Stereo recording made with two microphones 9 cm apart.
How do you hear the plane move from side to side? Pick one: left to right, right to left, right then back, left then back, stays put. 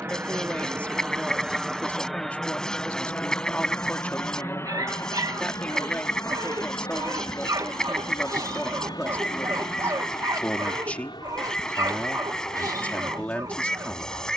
right to left.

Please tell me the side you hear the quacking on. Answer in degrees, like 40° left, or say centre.
10° left.